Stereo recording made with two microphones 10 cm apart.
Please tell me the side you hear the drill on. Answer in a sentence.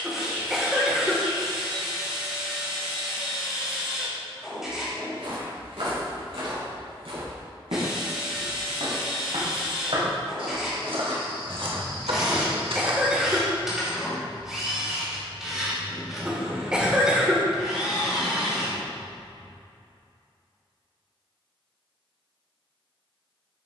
You can hear the drill in the centre.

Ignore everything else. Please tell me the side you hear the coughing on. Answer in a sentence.
You can hear the coughing in the centre.